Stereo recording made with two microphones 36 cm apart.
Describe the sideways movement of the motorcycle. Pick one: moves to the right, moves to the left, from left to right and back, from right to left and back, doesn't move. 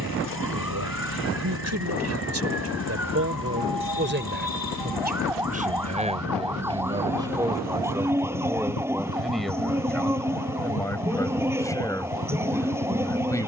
doesn't move.